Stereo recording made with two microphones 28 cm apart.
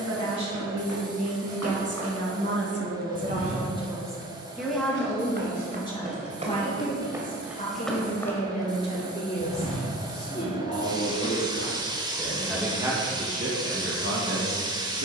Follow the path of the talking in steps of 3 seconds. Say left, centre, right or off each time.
right, centre, left, left, right.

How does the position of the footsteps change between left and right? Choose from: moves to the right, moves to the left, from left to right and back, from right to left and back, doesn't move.
moves to the left.